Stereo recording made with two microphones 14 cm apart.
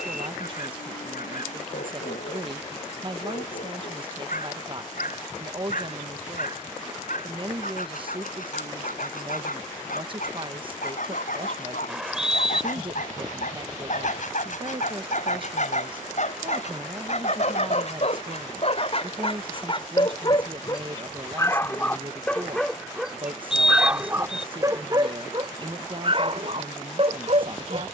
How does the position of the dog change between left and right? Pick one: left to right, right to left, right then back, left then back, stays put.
left to right.